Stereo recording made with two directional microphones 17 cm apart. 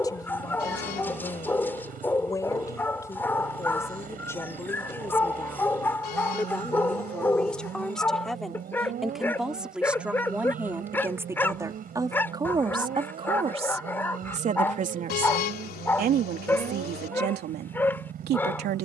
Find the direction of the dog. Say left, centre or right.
centre.